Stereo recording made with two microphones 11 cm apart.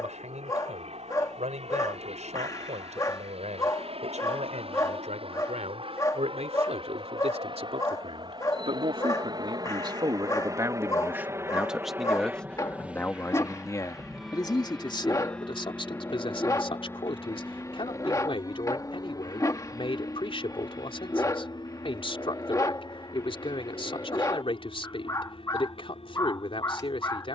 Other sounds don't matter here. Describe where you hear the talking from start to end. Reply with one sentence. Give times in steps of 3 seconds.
In this clip you hear the talking on the right from 0 s and on the left from 12 s.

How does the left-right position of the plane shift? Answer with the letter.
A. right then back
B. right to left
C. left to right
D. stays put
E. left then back
B.